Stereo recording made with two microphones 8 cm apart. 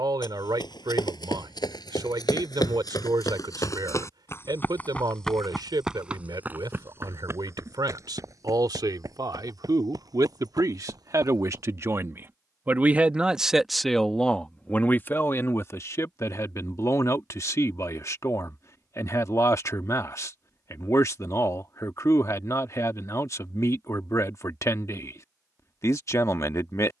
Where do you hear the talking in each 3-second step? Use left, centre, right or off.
right, right, right, right, centre, left, left, left, left.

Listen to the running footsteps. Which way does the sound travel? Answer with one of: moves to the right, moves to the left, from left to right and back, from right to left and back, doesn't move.
moves to the right.